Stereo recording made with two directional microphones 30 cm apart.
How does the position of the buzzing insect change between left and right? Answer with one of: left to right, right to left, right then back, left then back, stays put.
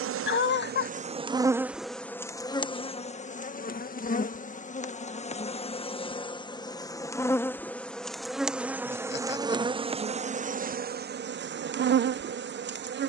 left then back.